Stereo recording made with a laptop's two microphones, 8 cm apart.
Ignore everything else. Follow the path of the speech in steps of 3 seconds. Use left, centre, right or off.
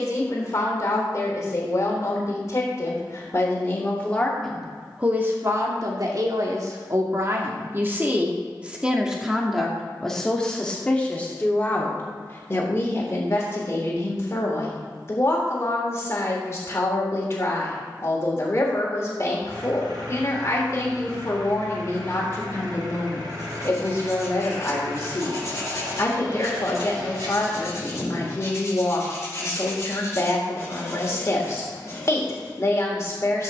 left, centre, right, centre, left, left, left, left, left, left, left.